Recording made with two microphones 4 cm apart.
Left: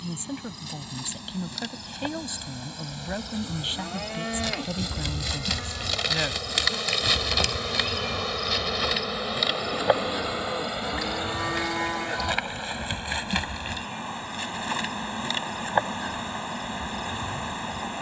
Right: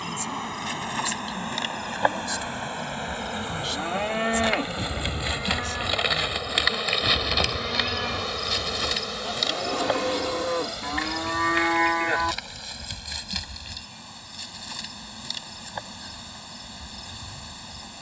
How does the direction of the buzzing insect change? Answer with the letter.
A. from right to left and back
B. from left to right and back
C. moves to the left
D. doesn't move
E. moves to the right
C.